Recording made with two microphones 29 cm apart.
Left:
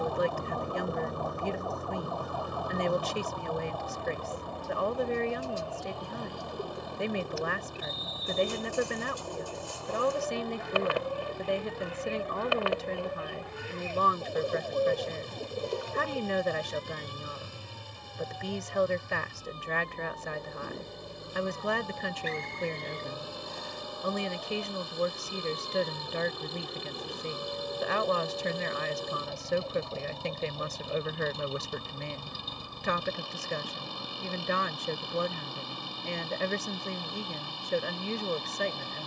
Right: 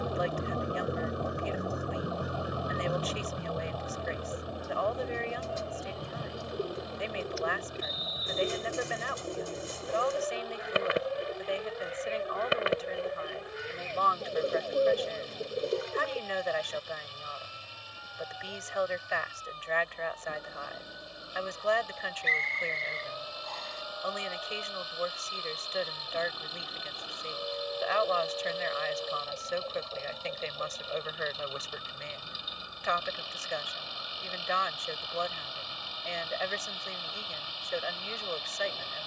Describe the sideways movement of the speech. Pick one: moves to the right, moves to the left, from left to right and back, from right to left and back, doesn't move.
doesn't move.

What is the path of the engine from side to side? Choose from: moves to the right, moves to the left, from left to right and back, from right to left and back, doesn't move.
doesn't move.